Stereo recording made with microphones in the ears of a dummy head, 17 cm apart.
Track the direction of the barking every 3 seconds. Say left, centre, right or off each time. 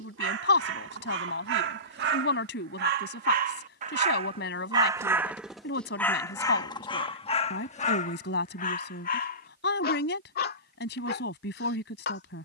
right, right, left, left.